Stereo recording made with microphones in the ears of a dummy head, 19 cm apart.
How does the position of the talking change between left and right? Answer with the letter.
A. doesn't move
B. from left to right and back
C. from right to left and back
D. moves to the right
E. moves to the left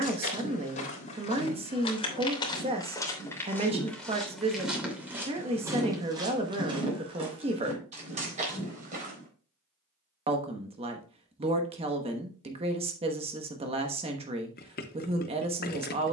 A.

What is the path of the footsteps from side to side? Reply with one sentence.
You can hear the footsteps move from left to right.